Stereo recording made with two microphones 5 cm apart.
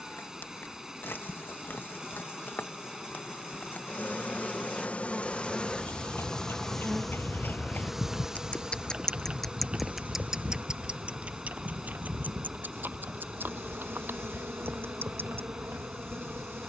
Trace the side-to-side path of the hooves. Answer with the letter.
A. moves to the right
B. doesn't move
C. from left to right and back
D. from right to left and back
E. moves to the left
A.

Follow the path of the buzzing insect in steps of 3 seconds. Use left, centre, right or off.
left, left, centre, right, right, right.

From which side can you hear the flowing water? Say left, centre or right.
centre.